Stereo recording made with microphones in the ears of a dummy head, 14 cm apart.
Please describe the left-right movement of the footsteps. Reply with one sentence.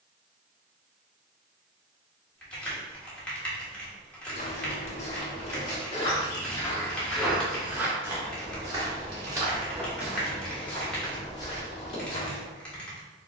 In this clip you hear the footsteps move from left to right and back again.